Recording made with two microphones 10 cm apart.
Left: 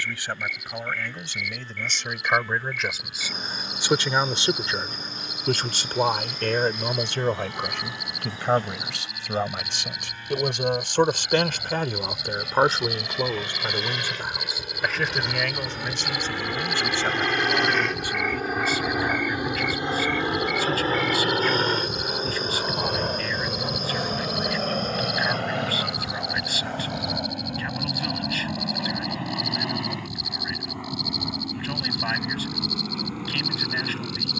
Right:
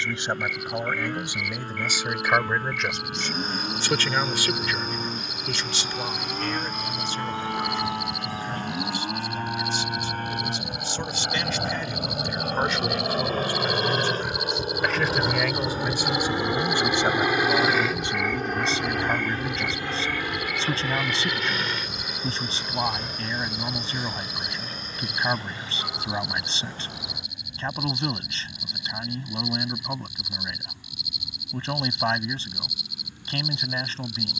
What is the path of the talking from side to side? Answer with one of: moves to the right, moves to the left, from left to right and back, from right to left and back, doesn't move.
from right to left and back.